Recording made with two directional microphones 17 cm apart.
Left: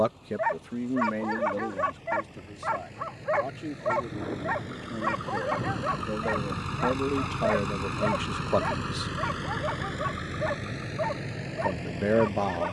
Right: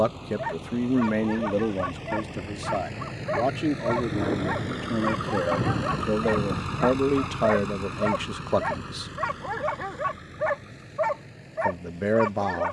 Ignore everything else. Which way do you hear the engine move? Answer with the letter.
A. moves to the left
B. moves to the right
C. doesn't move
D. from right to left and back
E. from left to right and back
A.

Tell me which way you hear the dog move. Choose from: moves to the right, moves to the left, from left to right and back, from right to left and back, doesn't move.
moves to the right.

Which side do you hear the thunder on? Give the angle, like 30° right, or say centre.
40° right.